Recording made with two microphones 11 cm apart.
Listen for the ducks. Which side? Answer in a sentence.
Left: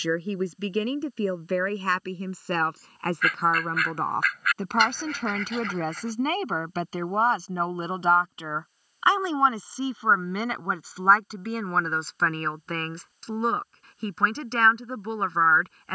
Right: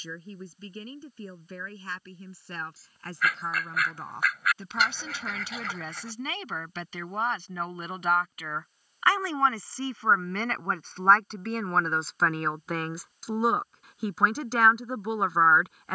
In this clip you hear the ducks in the centre.